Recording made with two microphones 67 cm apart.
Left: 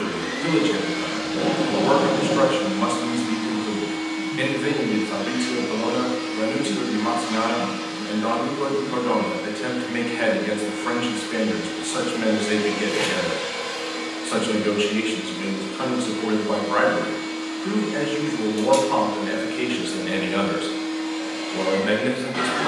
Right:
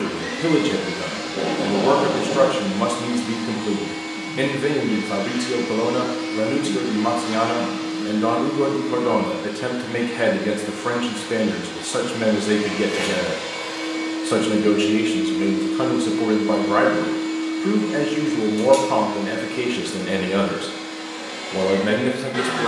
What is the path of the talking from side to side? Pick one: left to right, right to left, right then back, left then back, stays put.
stays put.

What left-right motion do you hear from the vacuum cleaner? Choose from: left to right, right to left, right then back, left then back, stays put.
left then back.